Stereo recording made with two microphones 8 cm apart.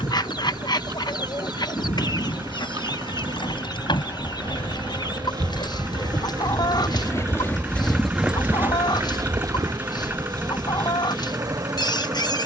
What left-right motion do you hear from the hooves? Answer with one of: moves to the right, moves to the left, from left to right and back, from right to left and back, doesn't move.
moves to the right.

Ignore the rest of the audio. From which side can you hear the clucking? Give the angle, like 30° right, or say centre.
60° left.